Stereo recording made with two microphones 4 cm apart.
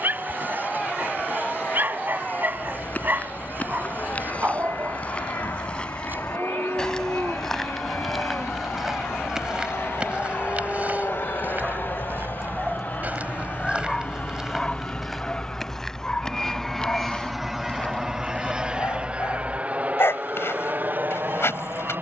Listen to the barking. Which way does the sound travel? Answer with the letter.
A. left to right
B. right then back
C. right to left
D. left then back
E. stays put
C.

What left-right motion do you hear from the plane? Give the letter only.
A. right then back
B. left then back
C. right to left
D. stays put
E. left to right
E.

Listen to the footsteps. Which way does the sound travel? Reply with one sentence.
In this clip you hear the footsteps move from left to right and back again.